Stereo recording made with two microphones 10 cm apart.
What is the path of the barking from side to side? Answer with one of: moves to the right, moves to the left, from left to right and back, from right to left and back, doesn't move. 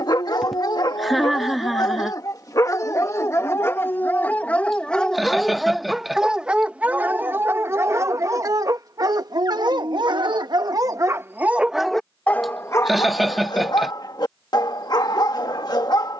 from left to right and back.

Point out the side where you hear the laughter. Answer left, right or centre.
centre.